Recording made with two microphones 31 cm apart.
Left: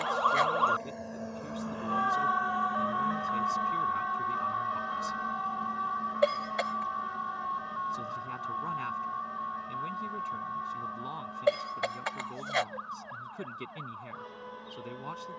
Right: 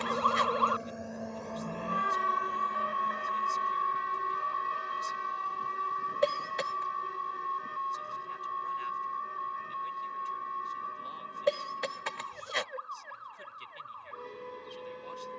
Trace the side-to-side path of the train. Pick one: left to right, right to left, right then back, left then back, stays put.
right to left.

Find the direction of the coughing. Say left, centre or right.
right.